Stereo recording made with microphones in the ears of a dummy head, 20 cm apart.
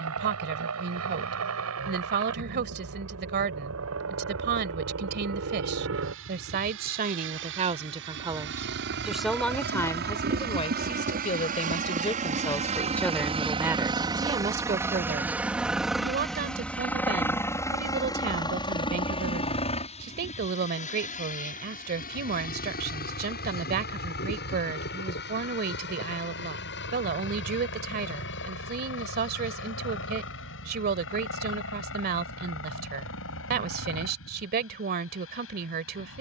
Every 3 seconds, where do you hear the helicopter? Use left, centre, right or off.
right, right, right, right, right, centre, left, left, left, left, left, left.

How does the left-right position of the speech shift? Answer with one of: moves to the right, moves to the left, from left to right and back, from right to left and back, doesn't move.
from right to left and back.